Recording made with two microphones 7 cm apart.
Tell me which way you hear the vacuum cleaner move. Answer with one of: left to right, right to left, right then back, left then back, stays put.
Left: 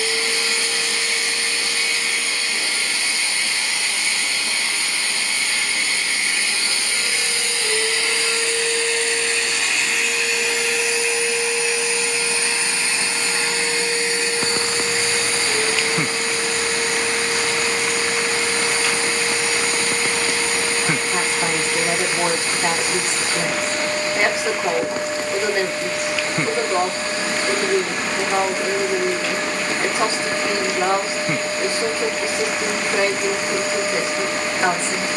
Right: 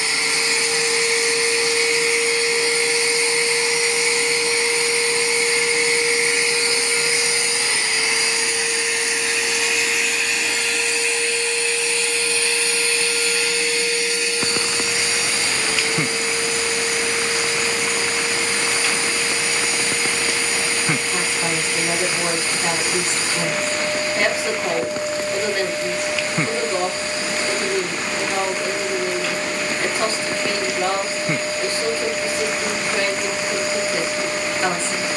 right to left.